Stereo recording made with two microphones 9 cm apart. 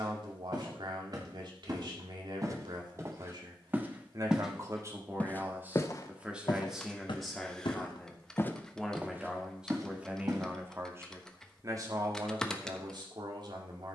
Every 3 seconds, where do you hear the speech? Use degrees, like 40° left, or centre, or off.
60° right, 40° right, centre, 20° right, 50° right.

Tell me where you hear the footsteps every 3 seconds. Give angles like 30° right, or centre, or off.
40° right, centre, 40° left, 30° right, off.